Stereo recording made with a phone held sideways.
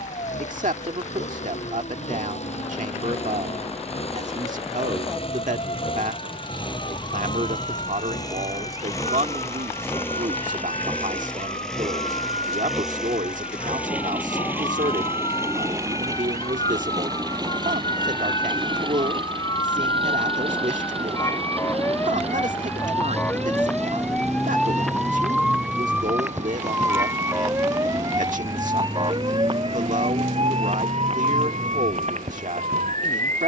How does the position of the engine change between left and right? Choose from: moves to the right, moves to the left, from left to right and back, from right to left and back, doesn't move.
moves to the right.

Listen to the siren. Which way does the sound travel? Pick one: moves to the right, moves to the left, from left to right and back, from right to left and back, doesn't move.
moves to the right.